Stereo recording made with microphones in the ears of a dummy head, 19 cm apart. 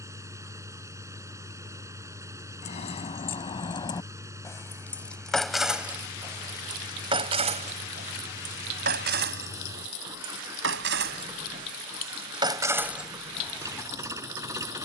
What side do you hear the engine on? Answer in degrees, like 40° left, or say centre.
10° right.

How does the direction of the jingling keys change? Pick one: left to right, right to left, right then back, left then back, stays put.
right then back.